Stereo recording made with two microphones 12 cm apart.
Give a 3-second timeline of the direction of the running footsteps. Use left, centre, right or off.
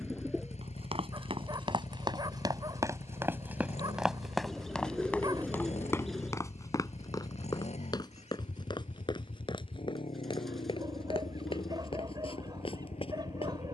right, centre, left, left, left.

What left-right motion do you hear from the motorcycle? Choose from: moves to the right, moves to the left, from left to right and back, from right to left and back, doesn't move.
doesn't move.